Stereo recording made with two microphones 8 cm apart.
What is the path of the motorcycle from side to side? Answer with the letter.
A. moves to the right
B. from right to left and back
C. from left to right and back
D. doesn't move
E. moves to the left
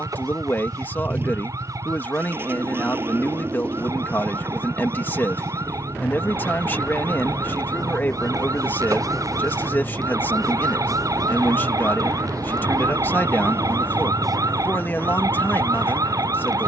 D.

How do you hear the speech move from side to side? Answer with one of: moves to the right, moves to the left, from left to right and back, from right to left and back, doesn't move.
doesn't move.